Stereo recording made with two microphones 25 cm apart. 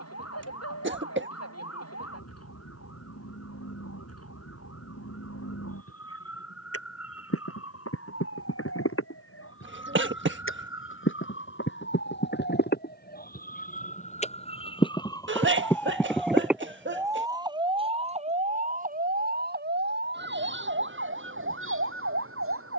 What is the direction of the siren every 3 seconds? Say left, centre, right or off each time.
left, left, left, left, left, centre, right, right.